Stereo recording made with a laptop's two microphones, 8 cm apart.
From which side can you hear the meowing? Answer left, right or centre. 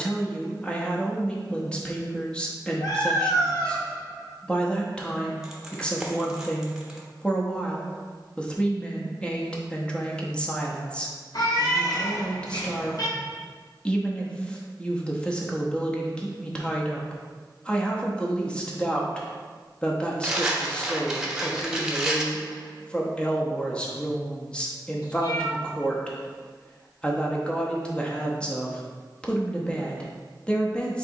left.